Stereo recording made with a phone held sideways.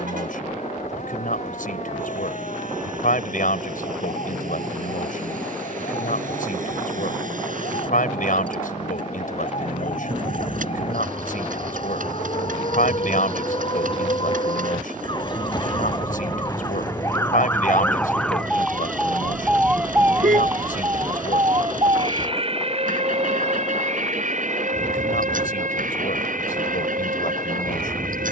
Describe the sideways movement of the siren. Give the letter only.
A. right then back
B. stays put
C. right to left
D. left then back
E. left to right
E.